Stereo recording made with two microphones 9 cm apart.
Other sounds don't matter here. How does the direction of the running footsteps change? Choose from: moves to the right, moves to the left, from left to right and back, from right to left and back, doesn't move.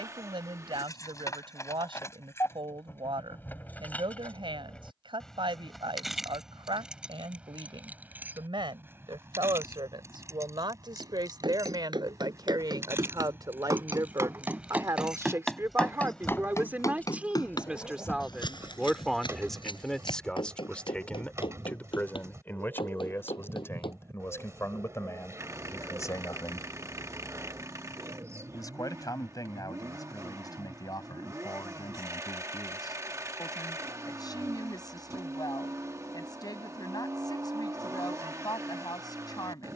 moves to the left.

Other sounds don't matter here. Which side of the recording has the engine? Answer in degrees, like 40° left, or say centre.
40° right.